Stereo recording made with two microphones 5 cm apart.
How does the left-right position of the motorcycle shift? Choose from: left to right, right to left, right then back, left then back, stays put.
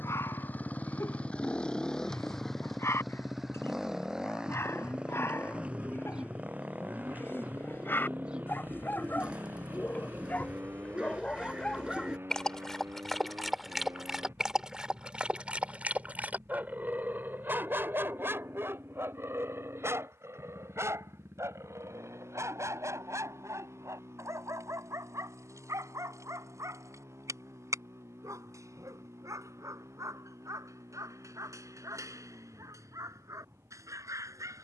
left to right.